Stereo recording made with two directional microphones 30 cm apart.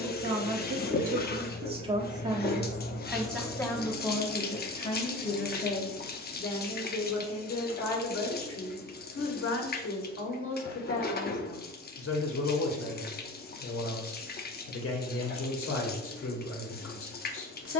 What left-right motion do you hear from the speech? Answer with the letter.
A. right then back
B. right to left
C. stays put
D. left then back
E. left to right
B.